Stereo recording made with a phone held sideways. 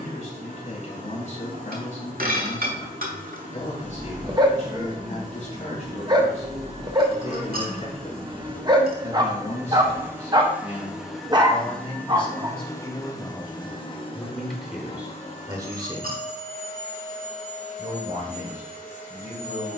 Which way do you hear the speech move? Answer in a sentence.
In this clip you hear the speech move from left to right.